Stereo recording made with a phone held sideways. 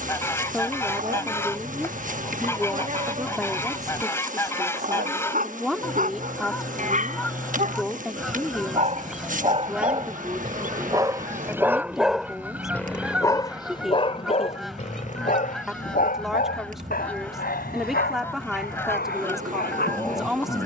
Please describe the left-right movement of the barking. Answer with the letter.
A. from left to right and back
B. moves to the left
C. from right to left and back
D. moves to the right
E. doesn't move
B.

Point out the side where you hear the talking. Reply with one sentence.
You can hear the talking in the centre.